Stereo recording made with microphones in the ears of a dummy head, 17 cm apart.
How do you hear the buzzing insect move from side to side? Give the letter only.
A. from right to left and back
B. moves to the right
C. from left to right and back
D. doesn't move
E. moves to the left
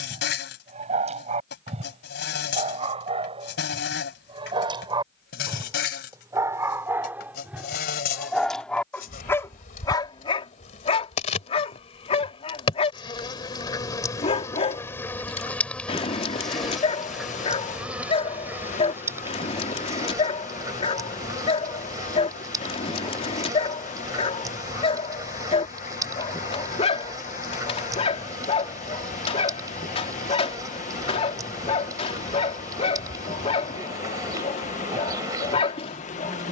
B.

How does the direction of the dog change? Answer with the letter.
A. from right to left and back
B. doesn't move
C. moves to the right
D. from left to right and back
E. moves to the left
E.